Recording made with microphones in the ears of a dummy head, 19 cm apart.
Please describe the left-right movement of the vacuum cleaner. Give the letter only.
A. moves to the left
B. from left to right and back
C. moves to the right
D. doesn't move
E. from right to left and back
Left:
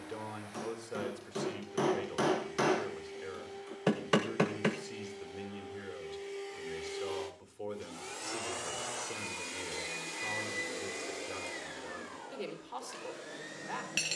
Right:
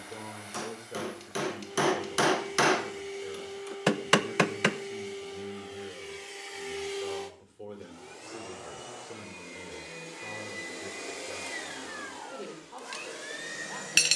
E.